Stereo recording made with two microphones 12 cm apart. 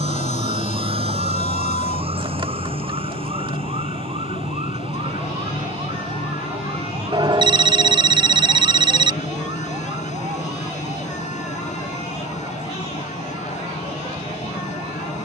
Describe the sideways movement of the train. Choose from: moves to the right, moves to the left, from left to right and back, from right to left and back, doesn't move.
doesn't move.